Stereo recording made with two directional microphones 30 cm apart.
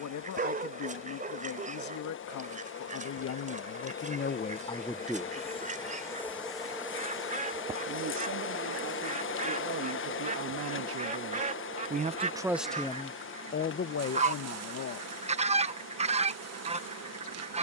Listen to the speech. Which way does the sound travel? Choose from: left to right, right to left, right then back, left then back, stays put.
right then back.